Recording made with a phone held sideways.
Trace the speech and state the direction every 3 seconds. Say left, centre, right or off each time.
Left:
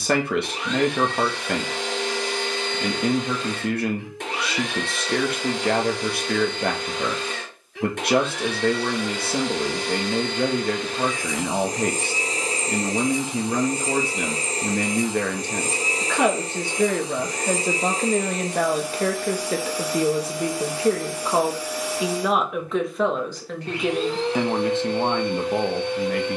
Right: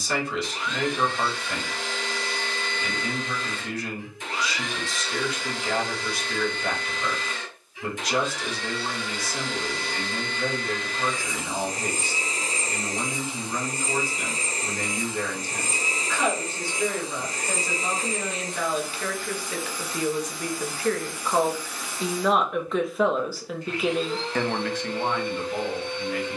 left, left, left, left, left, left, left, centre, left.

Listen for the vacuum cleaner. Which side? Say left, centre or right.
left.